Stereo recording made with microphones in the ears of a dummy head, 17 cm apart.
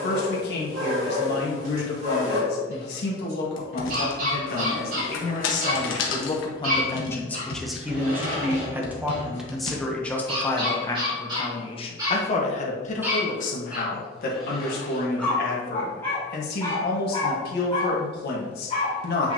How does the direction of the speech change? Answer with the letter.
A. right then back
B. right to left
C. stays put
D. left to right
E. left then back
A.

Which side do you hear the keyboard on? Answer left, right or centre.
left.